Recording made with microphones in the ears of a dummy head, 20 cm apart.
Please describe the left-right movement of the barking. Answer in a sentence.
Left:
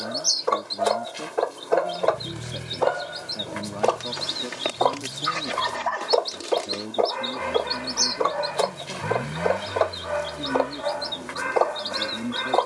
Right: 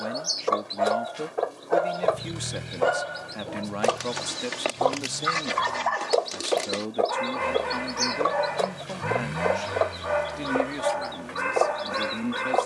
In this clip you hear the barking stay put.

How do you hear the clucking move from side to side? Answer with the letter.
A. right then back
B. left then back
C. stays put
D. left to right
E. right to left
C.